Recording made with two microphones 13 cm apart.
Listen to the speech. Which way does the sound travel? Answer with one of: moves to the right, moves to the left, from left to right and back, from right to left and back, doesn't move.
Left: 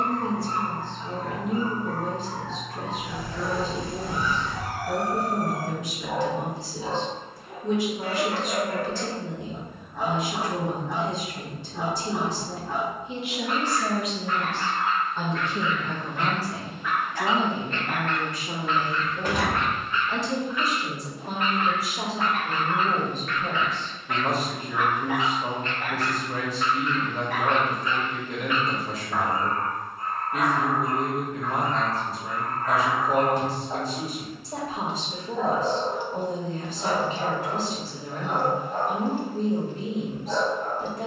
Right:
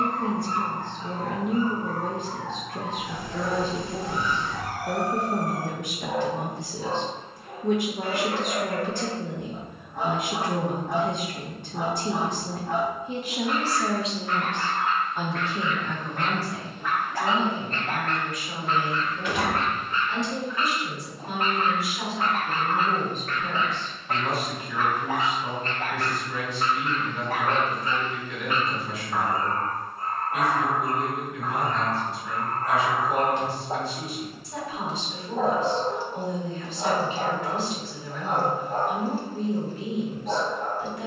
moves to the left.